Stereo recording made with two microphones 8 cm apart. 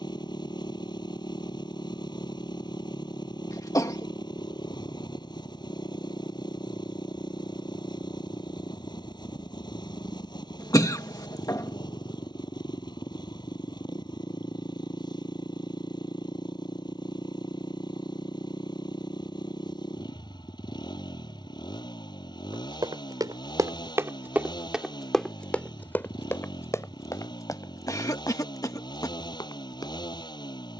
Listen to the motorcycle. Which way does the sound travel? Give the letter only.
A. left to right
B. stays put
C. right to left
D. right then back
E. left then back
B.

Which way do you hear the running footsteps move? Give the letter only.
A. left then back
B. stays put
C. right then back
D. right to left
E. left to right
D.